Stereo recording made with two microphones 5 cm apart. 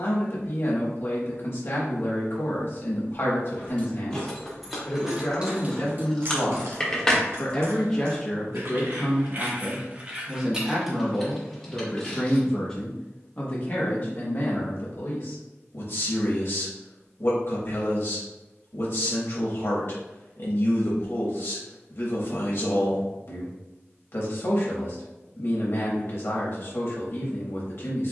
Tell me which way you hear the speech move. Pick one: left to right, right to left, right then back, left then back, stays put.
right then back.